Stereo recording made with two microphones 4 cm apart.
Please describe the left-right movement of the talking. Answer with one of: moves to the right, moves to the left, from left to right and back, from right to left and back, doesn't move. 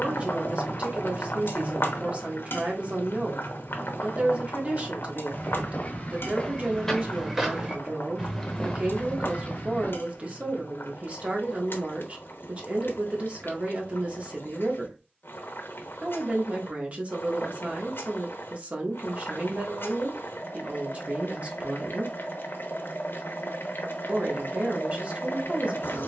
doesn't move.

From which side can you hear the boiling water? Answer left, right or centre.
left.